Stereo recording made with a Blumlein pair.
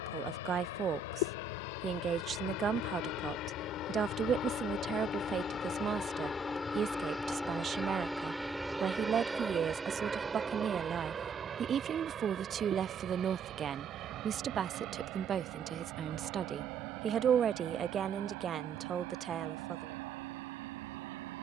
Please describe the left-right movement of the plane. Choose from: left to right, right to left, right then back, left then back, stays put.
left to right.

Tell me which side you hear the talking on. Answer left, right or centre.
right.